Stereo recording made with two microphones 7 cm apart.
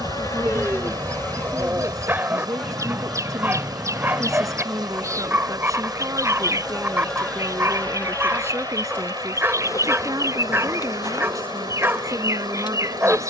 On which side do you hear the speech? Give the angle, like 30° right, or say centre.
50° right.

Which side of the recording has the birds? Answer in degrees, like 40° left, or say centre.
40° right.